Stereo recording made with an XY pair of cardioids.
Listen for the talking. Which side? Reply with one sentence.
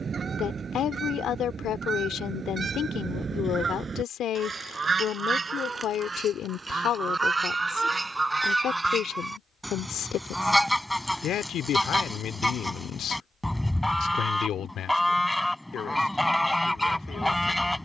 In this clip you hear the talking on the left.